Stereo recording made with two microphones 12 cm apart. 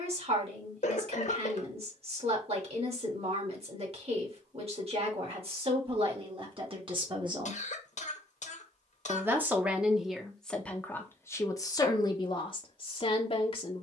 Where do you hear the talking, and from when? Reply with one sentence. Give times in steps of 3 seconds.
You can hear the talking on the right from 0 s, in the centre from 9 s and on the left from 12 s.